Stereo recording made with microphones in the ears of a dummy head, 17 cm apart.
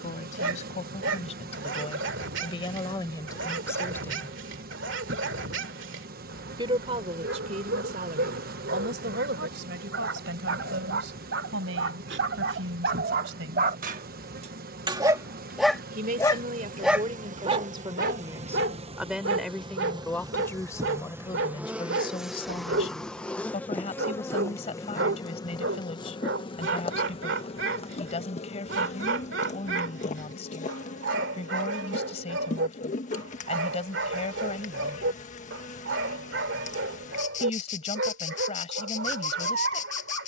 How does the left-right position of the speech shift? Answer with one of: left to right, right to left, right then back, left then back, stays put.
right then back.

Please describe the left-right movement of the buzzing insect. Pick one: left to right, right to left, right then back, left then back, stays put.
right to left.